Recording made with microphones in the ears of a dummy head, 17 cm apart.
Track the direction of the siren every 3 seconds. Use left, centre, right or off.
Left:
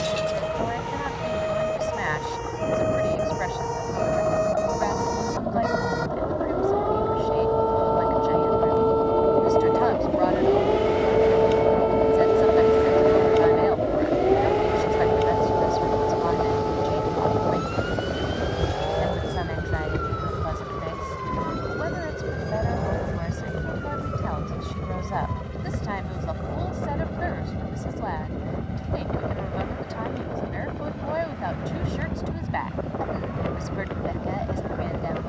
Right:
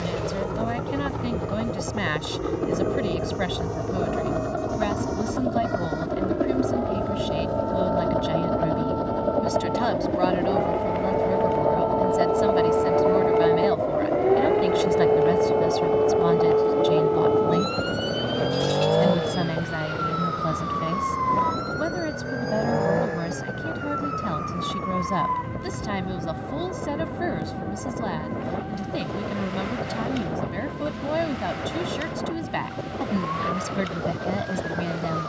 left, left, left, left, centre, right, right, right, right, right, right, right.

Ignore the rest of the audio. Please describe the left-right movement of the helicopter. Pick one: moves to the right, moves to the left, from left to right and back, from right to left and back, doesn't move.
moves to the left.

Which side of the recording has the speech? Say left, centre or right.
right.